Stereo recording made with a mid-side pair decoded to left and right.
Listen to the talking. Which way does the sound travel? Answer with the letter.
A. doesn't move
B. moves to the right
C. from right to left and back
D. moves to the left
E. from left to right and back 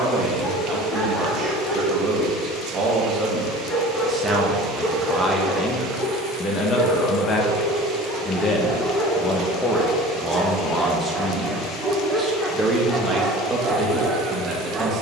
C.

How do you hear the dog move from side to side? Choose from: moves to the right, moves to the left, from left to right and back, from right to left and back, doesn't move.
moves to the right.